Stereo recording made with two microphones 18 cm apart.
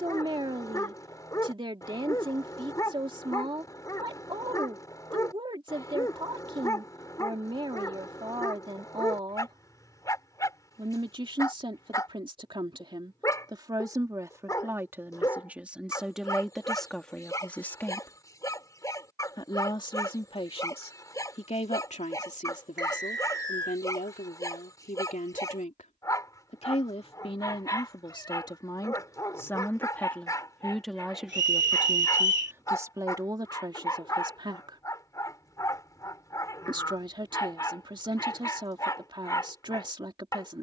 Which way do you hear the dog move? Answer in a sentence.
In this clip you hear the dog stay put.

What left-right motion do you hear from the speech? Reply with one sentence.
You can hear the speech move from right to left and back again.